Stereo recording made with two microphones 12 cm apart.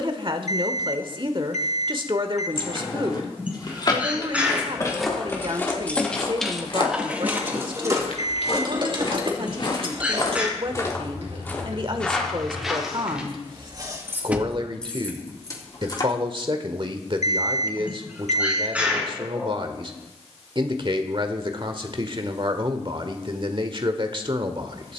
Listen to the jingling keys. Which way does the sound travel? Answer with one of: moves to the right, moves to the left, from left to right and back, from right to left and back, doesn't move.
from left to right and back.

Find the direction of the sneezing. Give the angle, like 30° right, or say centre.
10° right.